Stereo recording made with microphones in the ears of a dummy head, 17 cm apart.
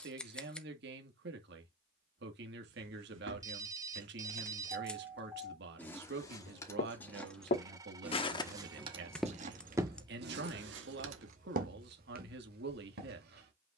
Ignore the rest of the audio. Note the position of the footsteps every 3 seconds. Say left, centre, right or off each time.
off, off, left, right, right.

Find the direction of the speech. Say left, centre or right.
right.